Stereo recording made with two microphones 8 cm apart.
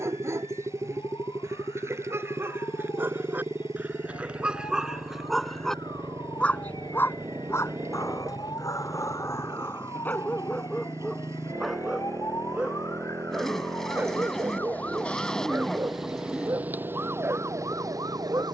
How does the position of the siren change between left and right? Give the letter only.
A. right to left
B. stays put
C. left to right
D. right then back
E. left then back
C.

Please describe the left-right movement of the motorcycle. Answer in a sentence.
You can hear the motorcycle stay put.